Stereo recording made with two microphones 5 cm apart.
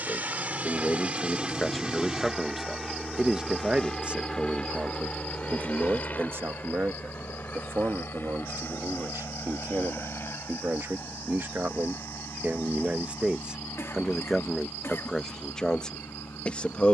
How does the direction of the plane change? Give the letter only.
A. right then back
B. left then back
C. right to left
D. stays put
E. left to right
C.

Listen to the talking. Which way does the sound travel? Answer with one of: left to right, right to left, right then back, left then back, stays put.
right then back.